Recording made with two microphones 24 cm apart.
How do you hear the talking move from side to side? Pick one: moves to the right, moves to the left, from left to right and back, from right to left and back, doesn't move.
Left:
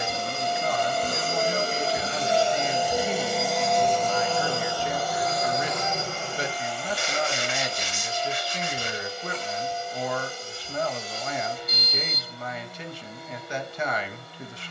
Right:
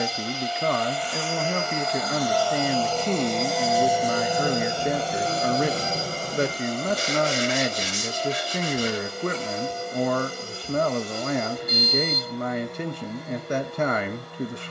doesn't move.